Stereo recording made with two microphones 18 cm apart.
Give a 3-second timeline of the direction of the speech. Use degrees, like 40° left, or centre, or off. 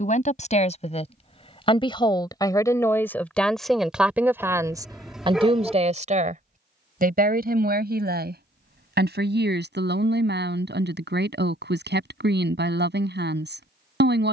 30° left, 10° right, 60° right, 70° right, 70° right.